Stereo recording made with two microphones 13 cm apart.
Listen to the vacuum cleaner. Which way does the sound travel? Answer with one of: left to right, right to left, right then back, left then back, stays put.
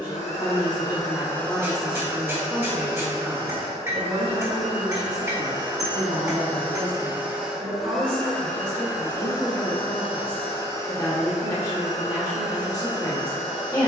right then back.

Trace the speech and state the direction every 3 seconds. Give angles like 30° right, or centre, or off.
20° left, 40° right, 50° right, 20° left, 30° left.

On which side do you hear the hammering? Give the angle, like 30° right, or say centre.
20° right.